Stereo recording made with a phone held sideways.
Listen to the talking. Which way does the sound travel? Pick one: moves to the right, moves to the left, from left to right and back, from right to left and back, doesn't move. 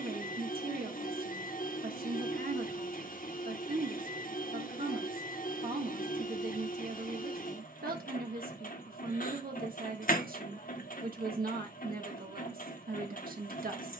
doesn't move.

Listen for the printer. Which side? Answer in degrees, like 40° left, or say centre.
60° left.